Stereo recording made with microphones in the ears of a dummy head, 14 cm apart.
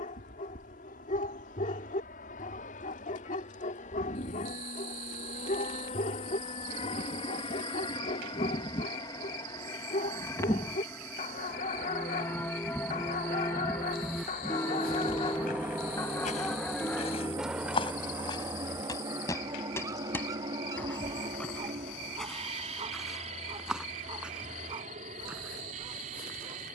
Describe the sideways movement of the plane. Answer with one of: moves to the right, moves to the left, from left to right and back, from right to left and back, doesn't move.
moves to the right.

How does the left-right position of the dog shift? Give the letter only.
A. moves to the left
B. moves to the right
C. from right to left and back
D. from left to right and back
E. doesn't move
B.